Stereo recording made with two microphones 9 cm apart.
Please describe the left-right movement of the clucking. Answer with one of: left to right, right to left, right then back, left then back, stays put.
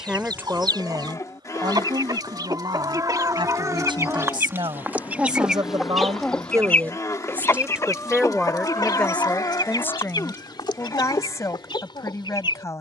right to left.